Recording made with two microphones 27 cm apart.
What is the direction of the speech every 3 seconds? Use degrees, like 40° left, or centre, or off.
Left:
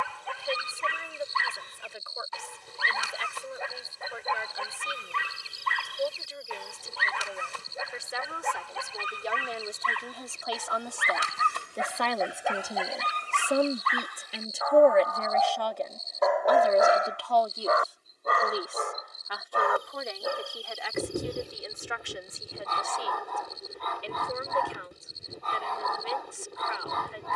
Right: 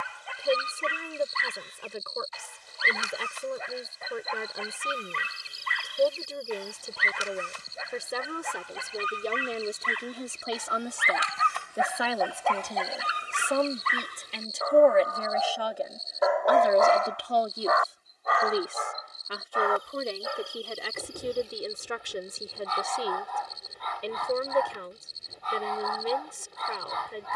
50° right, 50° right, 50° right, 30° right, 10° left, 10° right, 40° right, 50° right, 50° right.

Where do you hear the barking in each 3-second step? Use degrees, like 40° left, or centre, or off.
60° left, 60° left, 60° left, 50° left, 10° right, centre, 50° left, 50° left, 50° left.